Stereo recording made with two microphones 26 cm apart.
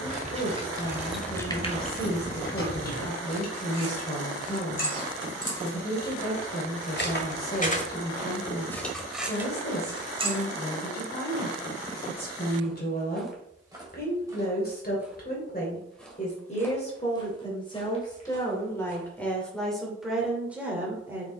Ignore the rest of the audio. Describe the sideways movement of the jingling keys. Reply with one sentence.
You can hear the jingling keys move from right to left and back again.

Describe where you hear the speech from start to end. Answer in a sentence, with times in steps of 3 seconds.
In this clip you hear the speech on the left from 0 s and in the centre from 18 s.